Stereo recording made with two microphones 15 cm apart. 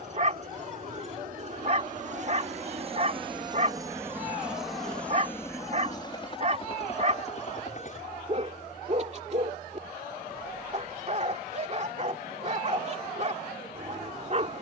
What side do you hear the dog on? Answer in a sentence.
In this clip you hear the dog on the right.